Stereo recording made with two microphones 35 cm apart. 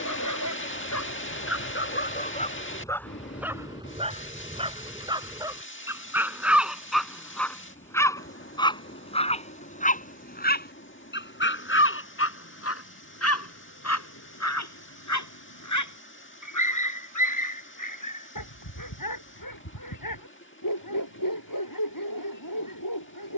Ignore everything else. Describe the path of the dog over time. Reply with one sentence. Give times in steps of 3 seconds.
In this clip you hear the dog on the left from 0 s, in the centre from 3 s and on the left from 9 s.